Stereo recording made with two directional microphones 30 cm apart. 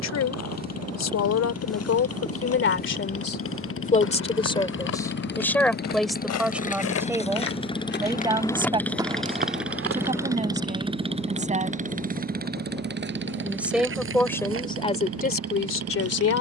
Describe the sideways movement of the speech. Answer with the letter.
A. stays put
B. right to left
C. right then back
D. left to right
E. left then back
C.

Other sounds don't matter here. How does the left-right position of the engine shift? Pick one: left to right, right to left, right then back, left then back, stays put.
left to right.